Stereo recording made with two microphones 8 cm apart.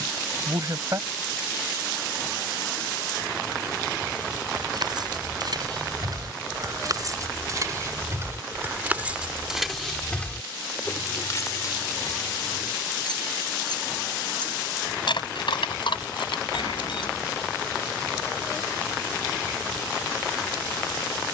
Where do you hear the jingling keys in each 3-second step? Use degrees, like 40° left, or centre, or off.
off, 60° right, 40° right, 20° left, 50° left, 80° left, off.